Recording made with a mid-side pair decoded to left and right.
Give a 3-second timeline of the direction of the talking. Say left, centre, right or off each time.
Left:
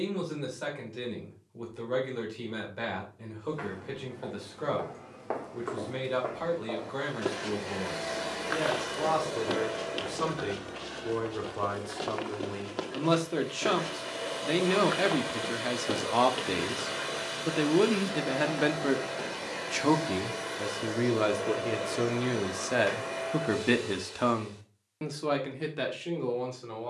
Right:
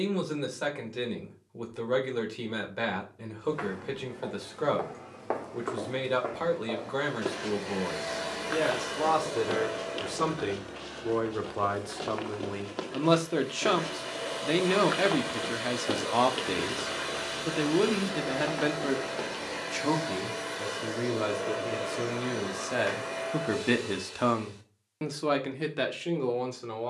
right, right, right, right, right, centre, left, left, right.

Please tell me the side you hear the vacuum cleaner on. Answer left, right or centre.
centre.